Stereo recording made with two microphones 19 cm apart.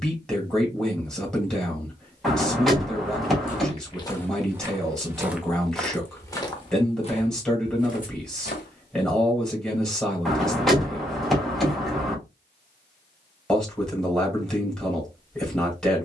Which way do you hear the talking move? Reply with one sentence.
In this clip you hear the talking stay in one place.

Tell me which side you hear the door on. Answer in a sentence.
In this clip you hear the door in the centre.